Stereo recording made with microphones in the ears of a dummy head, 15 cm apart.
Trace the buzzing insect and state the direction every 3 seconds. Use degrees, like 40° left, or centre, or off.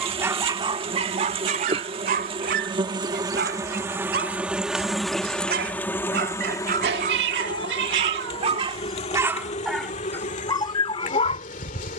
40° right, 10° right, 30° left, 50° left.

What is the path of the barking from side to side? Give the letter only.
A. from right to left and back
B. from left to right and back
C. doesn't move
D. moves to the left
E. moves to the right
B.